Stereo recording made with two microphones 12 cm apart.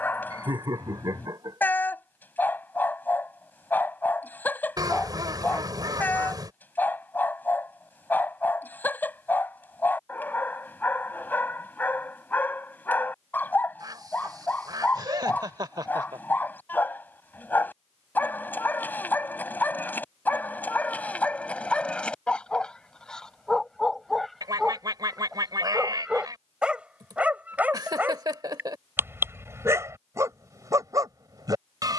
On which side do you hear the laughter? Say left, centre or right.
right.